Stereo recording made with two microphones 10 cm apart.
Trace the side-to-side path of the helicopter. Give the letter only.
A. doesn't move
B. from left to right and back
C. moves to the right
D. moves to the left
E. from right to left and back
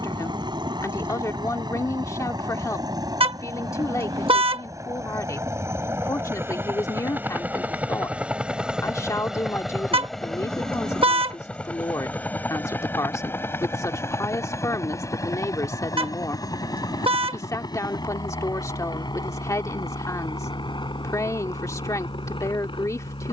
D.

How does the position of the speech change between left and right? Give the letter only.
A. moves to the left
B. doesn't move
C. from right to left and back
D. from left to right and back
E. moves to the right
B.